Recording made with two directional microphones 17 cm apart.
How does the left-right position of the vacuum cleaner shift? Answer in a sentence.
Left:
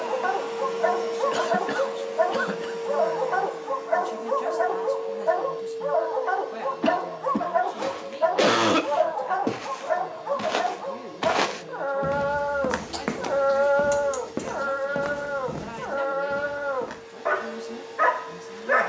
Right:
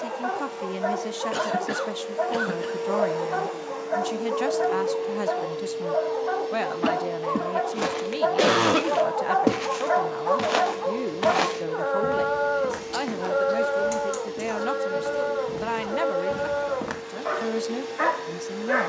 In this clip you hear the vacuum cleaner move to the right.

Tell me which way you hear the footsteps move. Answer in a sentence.
You can hear the footsteps go left and come back.